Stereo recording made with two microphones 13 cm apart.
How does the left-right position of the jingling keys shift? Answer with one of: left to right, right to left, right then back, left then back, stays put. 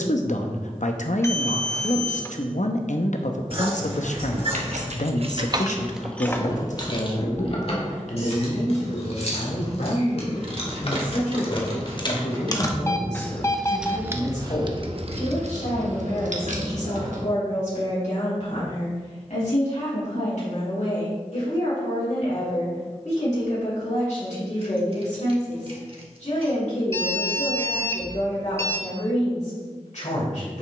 left then back.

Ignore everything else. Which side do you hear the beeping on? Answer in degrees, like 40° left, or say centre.
20° left.